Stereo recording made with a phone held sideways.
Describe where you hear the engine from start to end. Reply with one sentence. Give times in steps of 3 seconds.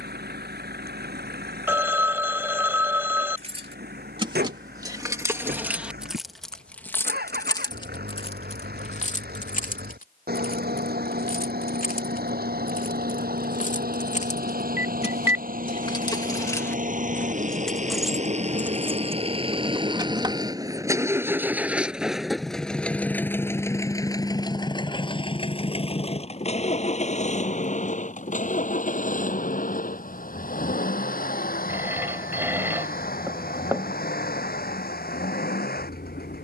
You can hear the engine on the right from 0 s, in the centre from 21 s and on the left from 24 s.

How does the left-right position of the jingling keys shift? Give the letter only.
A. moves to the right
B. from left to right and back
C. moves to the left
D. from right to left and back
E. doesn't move
D.